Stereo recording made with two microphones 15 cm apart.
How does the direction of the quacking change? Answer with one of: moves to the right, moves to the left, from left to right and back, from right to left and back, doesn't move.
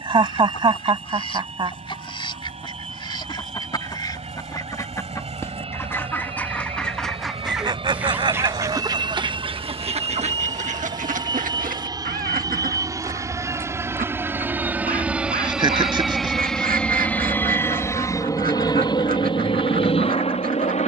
moves to the right.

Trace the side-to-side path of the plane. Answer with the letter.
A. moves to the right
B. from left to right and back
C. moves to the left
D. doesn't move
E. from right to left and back
C.